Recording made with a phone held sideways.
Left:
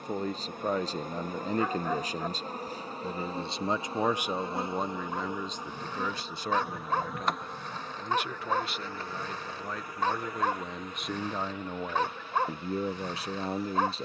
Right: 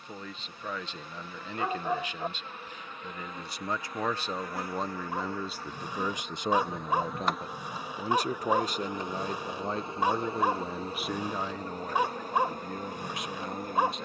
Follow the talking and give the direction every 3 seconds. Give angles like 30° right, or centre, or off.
40° left, 10° left, 30° right, 10° right, 30° left.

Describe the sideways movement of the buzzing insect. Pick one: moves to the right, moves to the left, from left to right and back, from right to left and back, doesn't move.
moves to the right.